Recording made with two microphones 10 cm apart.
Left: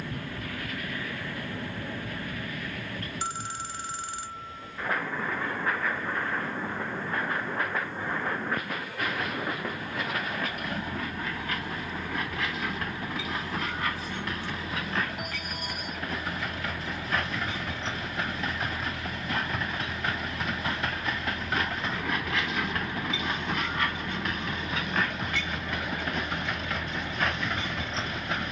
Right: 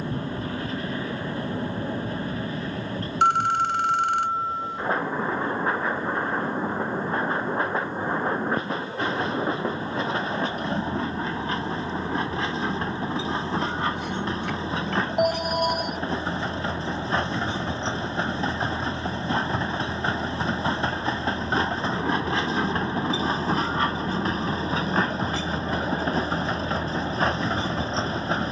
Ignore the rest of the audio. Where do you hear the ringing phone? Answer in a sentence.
You can hear the ringing phone on the right.